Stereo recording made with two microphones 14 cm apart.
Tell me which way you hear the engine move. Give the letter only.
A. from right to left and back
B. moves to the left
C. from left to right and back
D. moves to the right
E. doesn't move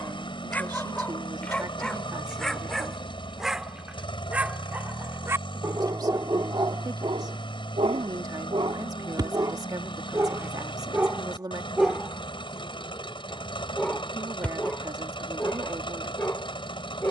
E.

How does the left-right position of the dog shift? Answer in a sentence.
In this clip you hear the dog move from left to right and back again.